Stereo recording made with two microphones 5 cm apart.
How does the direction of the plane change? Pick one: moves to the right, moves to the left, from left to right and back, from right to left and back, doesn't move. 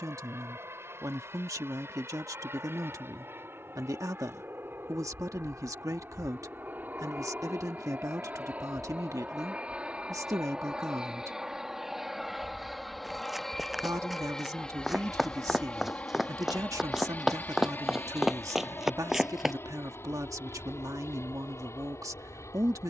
moves to the left.